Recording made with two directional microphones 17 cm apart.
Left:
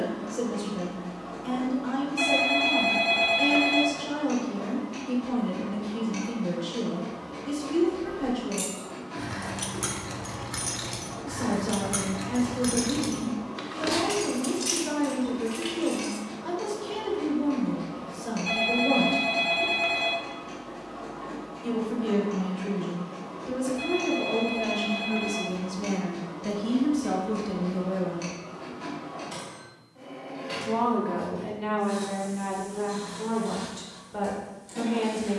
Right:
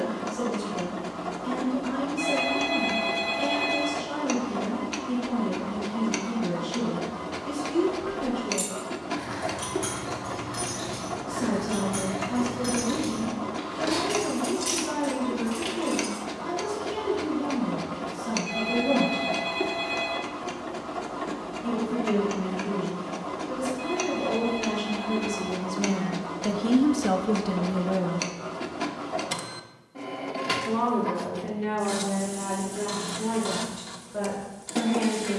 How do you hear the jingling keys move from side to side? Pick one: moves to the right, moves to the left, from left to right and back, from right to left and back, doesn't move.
from right to left and back.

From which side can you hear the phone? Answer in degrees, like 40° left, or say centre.
40° left.